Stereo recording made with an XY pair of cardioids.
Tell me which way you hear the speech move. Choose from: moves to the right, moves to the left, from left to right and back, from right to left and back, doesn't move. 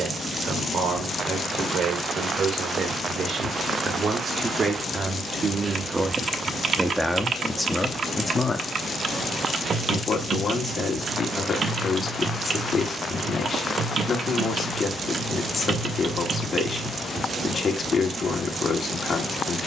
moves to the left.